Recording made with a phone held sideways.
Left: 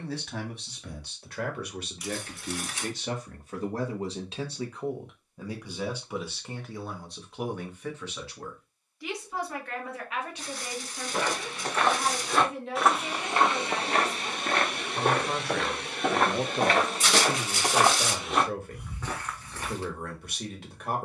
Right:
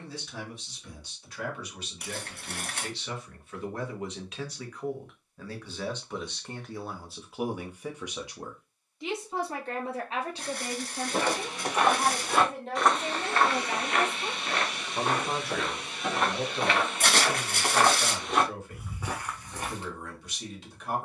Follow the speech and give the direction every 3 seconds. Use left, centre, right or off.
left, left, centre, right, right, left, left.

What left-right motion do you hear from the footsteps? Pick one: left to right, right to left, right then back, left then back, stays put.
left then back.